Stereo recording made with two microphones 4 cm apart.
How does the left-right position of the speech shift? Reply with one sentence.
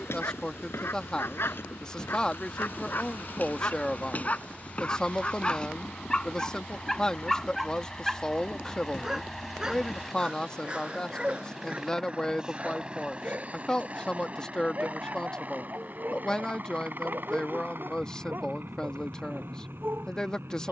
In this clip you hear the speech stay in one place.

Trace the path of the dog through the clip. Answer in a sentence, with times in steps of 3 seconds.
In this clip you hear the dog on the left from 0 s, in the centre from 6 s and on the right from 9 s.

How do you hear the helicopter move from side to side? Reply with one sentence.
In this clip you hear the helicopter move from left to right.